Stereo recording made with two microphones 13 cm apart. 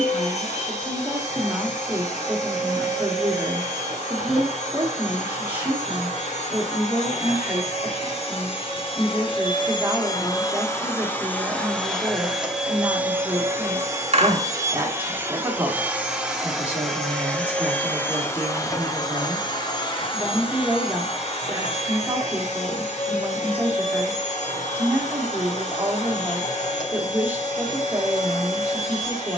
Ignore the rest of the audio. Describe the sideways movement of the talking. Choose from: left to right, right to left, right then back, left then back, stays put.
stays put.